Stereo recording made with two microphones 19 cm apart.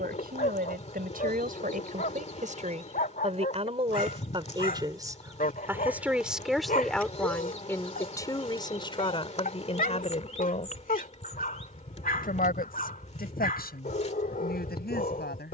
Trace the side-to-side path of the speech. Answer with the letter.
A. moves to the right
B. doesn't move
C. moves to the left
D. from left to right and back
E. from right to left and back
C.